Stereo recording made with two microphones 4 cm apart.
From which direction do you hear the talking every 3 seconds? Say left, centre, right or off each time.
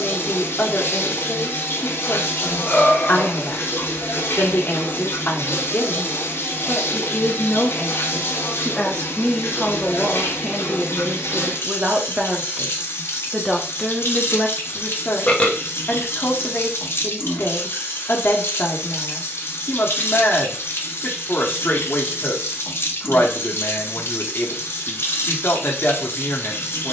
left, left, left, centre, centre, left, left, left, left.